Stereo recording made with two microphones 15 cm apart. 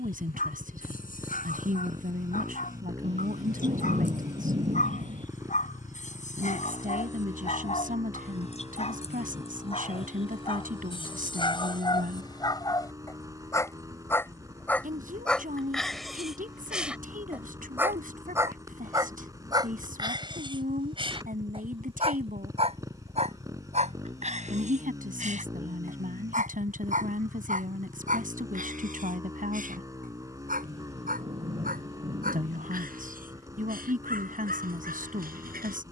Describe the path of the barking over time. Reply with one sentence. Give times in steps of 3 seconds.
In this clip you hear the barking on the left from 0 s, in the centre from 15 s and on the right from 18 s.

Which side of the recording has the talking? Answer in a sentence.
In this clip you hear the talking on the right.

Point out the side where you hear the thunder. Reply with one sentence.
You can hear the thunder on the right.